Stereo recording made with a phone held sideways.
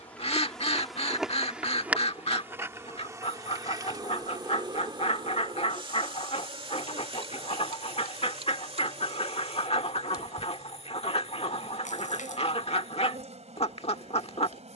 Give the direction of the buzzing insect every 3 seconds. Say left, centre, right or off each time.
centre, right, right, right, right.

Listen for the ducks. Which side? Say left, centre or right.
left.